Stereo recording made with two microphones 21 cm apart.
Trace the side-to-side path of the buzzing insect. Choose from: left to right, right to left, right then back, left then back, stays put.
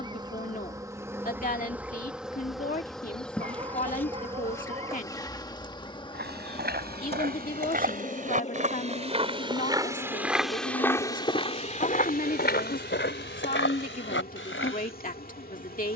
right to left.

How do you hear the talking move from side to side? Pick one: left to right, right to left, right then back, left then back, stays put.
stays put.